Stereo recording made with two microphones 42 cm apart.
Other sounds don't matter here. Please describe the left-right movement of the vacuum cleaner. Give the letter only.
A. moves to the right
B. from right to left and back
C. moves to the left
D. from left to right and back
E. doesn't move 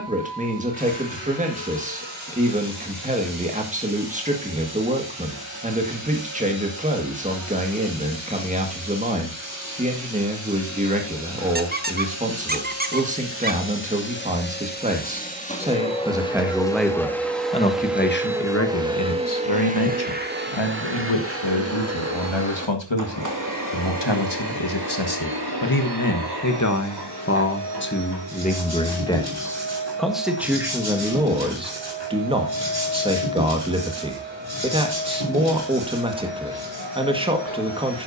A.